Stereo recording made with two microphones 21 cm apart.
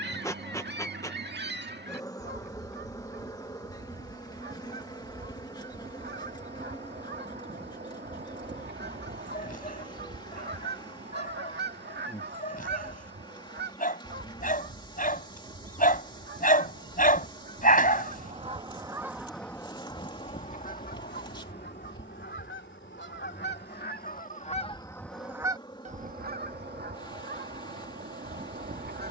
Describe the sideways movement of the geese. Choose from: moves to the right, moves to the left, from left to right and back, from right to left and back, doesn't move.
from right to left and back.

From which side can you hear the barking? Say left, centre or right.
left.